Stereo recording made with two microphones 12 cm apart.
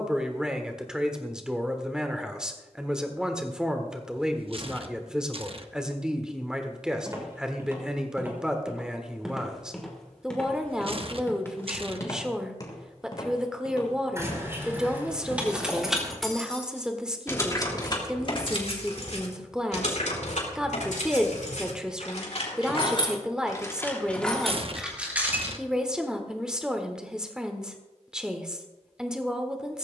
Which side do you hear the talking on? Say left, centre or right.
centre.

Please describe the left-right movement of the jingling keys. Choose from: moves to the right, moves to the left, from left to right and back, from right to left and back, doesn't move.
from right to left and back.